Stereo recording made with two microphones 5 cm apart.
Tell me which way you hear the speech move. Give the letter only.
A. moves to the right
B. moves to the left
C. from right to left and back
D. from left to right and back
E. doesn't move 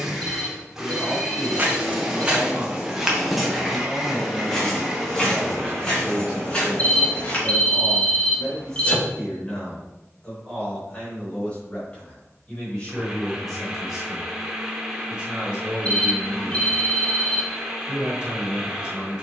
C.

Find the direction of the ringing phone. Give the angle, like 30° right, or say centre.
30° left.